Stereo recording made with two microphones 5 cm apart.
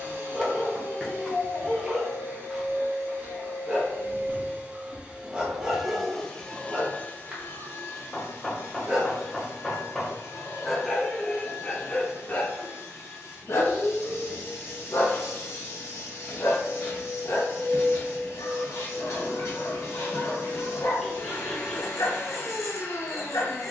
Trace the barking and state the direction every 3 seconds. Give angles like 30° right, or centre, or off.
20° right, 20° right, 20° right, 10° left, 50° left, 70° left, 70° left, 70° left.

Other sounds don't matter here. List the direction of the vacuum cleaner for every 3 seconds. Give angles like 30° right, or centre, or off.
50° right, 30° right, 40° left, 60° left, 60° left, 60° left, 60° left, 60° left.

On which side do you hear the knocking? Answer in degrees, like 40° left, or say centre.
centre.